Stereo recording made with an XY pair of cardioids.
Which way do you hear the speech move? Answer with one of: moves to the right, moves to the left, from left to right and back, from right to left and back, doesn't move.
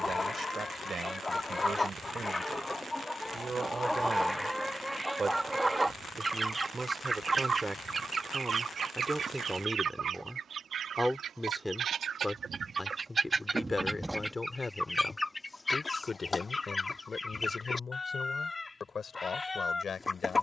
moves to the left.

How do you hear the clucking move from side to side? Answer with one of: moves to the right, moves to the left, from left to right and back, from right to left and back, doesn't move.
from left to right and back.